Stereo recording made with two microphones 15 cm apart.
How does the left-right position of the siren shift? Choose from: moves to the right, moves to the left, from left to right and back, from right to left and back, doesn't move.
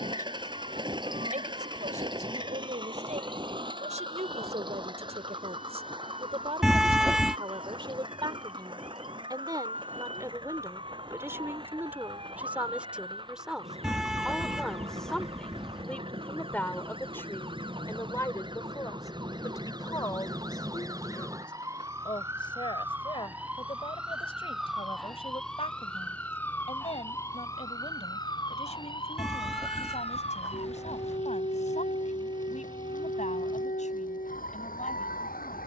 moves to the left.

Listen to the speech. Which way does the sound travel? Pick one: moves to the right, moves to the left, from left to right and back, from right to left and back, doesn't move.
moves to the left.